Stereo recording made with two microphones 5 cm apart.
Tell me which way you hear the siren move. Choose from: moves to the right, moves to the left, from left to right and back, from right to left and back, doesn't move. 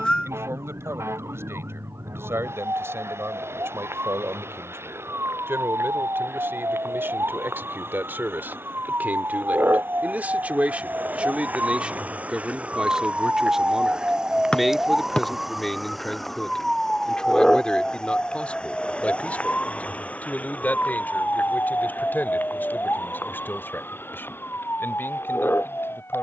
moves to the left.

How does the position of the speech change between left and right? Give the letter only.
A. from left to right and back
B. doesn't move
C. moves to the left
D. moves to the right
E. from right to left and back
C.